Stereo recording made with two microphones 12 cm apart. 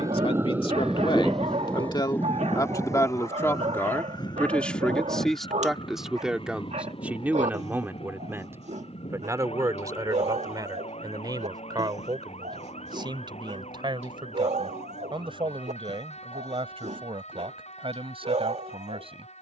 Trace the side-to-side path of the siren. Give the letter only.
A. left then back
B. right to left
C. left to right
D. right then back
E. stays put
B.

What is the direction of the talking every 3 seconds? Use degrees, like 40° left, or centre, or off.
40° left, 10° left, 10° right, 30° right, 40° right, 50° right, 50° right.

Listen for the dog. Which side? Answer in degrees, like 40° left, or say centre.
60° right.